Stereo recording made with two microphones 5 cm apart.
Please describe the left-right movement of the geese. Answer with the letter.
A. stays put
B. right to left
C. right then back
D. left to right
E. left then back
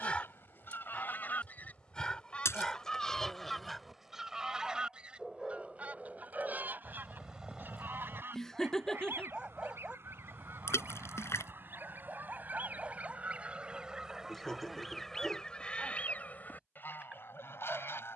C.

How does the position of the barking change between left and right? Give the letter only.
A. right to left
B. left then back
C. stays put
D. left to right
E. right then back
D.